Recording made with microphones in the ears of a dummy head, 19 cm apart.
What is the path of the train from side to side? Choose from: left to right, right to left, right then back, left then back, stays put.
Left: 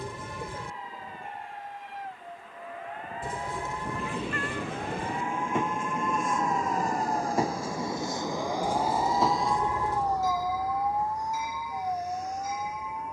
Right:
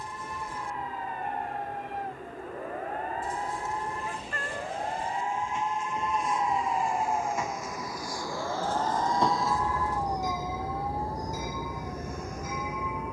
left to right.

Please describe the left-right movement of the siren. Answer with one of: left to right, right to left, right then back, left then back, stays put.
right to left.